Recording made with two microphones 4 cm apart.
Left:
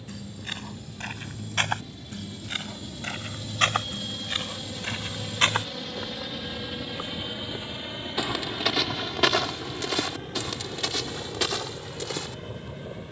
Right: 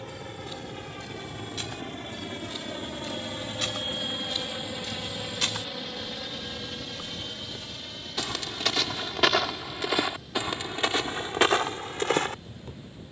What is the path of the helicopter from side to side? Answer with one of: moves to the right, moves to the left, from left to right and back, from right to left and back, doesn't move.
moves to the left.